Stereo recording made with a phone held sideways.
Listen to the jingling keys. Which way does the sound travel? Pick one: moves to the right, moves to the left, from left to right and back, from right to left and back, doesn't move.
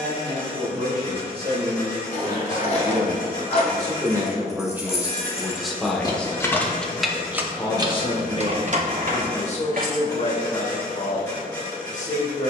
moves to the right.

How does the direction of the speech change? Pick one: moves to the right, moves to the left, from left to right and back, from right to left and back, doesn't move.
moves to the left.